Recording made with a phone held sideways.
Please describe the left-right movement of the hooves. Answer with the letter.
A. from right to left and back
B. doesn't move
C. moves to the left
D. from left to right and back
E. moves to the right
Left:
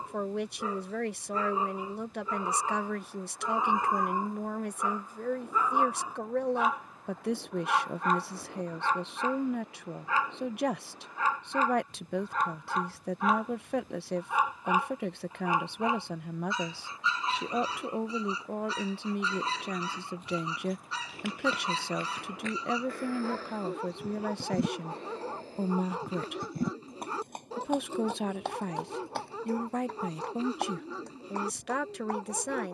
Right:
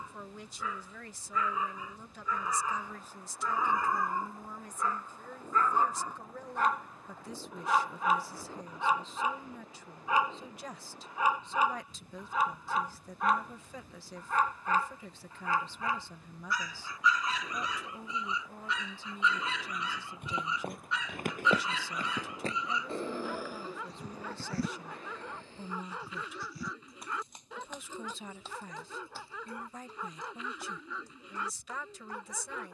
C.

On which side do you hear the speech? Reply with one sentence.
In this clip you hear the speech on the left.